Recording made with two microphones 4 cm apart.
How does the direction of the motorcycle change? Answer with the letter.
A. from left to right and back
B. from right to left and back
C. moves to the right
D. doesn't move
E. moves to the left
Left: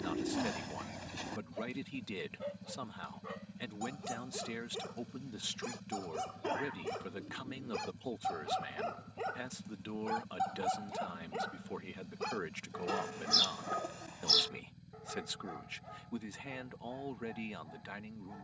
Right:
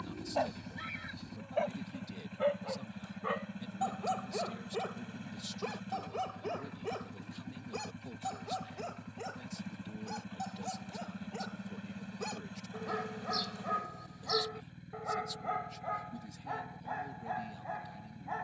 D.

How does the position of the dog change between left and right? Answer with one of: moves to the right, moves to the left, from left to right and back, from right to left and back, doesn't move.
from right to left and back.